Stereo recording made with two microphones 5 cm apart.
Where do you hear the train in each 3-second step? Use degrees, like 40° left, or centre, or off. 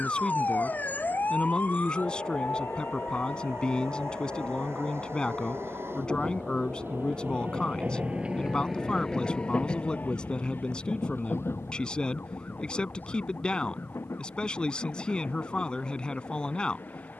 80° right, 70° right, 40° right, 40° left, 70° left, 80° left.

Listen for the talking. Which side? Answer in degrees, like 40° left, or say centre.
20° left.